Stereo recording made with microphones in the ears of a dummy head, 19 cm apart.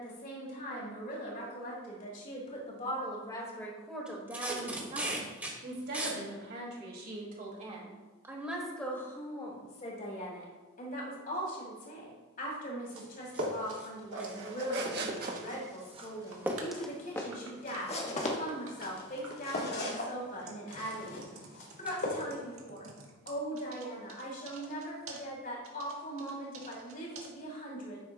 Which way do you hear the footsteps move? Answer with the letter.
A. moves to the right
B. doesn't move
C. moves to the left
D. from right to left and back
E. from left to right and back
C.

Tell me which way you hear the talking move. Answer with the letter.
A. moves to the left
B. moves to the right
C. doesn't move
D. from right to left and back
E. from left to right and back
E.